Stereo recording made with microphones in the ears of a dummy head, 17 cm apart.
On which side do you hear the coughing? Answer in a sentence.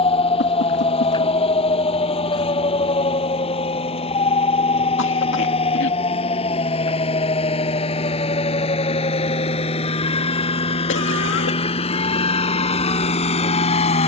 You can hear the coughing on the left.